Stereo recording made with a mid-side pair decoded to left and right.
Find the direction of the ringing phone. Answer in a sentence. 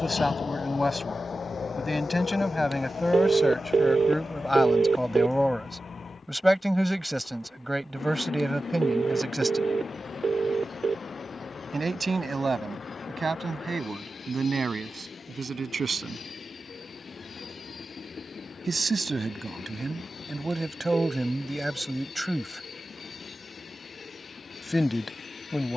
In this clip you hear the ringing phone on the right.